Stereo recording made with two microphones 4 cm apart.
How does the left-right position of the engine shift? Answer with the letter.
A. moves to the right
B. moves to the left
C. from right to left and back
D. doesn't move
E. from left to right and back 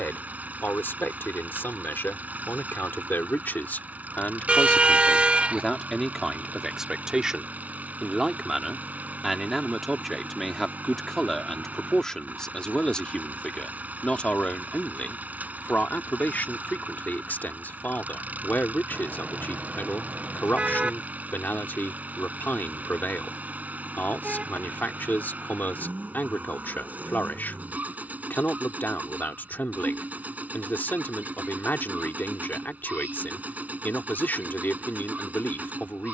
D.